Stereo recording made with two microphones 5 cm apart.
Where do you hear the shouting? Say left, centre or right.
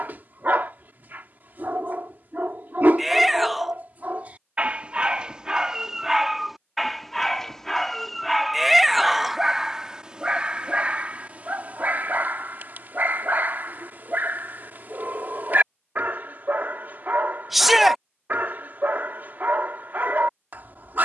centre.